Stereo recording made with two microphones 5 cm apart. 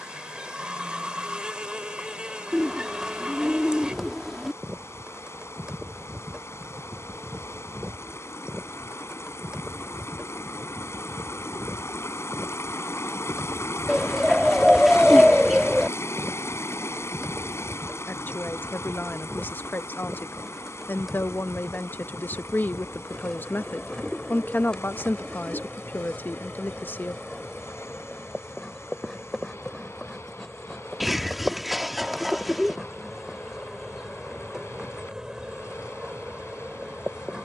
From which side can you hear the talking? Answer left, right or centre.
left.